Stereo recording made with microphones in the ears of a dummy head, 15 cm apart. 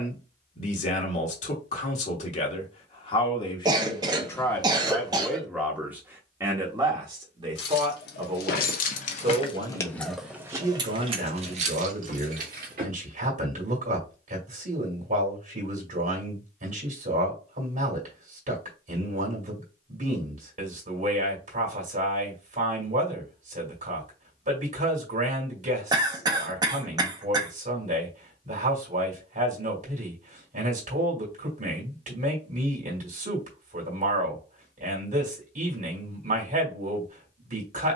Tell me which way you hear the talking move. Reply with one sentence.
You can hear the talking travel towards the right.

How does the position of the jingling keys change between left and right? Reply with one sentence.
You can hear the jingling keys move from left to right.